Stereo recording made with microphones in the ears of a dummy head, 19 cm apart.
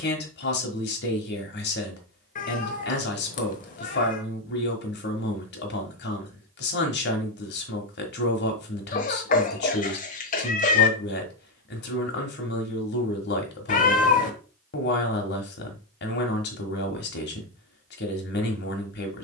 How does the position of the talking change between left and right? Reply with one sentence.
In this clip you hear the talking stay put.